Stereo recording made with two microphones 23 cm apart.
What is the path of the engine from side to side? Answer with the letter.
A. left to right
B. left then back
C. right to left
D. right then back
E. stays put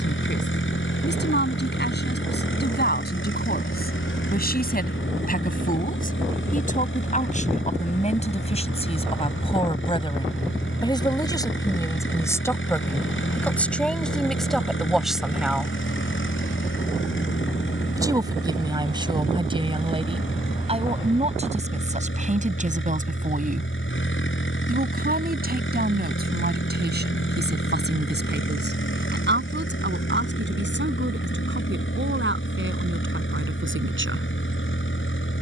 E.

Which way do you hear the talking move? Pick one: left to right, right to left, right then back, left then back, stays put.
left to right.